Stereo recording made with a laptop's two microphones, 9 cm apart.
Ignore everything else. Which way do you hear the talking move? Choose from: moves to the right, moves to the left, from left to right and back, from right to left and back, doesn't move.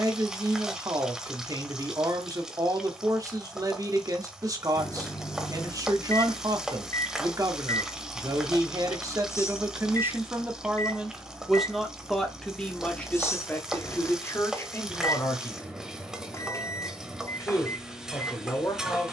moves to the left.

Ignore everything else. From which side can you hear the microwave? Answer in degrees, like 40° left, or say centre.
30° left.